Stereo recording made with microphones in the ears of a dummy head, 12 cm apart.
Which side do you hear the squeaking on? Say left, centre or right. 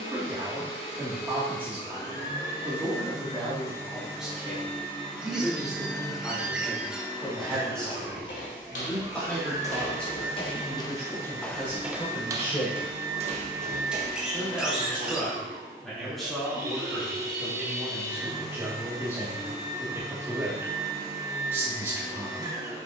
centre.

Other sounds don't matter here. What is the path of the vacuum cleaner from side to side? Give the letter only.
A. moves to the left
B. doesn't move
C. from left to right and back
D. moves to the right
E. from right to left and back
D.